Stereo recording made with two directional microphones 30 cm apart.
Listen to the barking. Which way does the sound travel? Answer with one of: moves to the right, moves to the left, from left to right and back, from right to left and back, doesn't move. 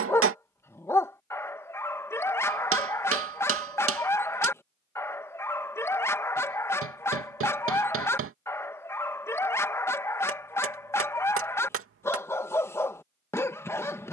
doesn't move.